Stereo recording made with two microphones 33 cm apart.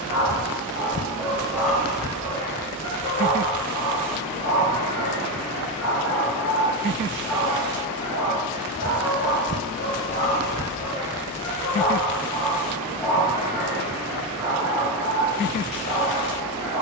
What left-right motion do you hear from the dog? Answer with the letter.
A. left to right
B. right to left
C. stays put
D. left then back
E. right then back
D.